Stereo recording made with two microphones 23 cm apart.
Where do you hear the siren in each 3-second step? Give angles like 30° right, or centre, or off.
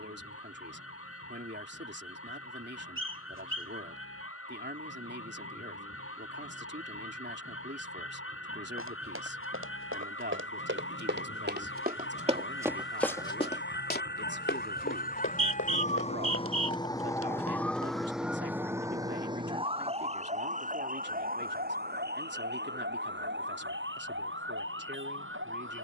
80° left, 80° left, 70° left, 70° left, 50° left, 20° left, 20° right, 50° right, 60° right.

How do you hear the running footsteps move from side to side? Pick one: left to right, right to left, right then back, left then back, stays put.
right to left.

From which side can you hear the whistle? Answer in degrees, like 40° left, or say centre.
60° right.